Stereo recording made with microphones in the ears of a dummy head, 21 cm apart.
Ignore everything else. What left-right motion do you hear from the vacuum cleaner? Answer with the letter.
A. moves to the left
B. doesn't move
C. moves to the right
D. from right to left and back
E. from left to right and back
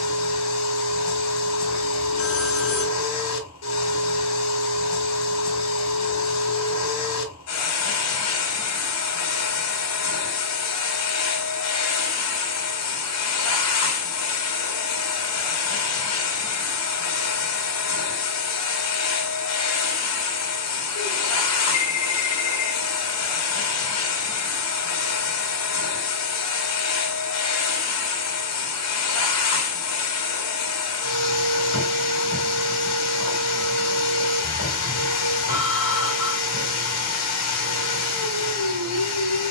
B.